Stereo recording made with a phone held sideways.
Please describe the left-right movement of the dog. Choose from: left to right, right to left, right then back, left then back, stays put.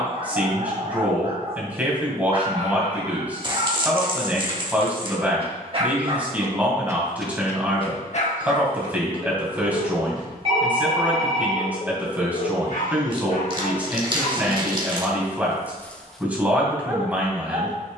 left then back.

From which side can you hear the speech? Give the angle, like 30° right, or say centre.
10° right.